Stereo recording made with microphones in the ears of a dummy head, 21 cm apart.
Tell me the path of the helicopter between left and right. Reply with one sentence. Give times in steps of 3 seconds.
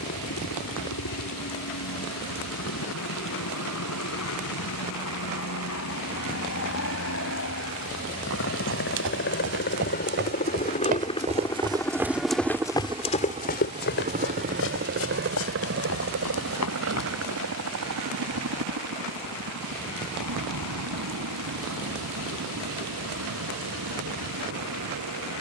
In this clip you hear the helicopter on the left from 0 s and on the right from 12 s.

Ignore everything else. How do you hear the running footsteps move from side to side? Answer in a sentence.
In this clip you hear the running footsteps travel towards the left.